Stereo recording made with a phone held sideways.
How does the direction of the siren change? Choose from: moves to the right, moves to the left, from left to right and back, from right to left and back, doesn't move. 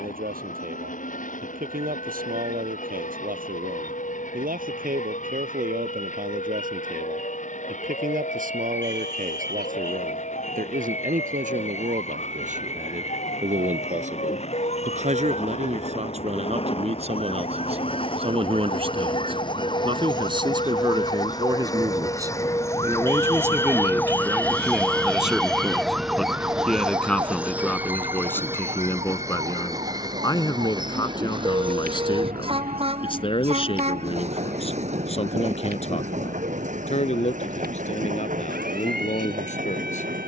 moves to the right.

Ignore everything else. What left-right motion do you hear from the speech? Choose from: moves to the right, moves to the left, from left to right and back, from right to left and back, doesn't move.
moves to the left.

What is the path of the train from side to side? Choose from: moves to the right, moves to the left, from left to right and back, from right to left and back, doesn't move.
moves to the right.